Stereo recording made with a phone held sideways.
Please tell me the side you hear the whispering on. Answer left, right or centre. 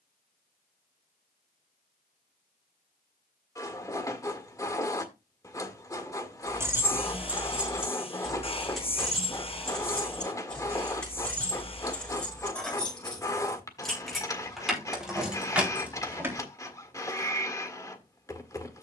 left.